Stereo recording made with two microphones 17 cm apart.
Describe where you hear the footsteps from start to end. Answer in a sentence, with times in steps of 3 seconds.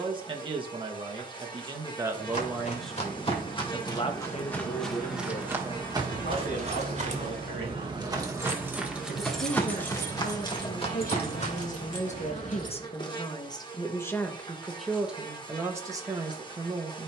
You can hear the footsteps on the left from 0 s, in the centre from 3 s, on the right from 6 s, on the left from 9 s and not at all from 12 s.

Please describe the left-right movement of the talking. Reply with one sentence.
In this clip you hear the talking go left and come back.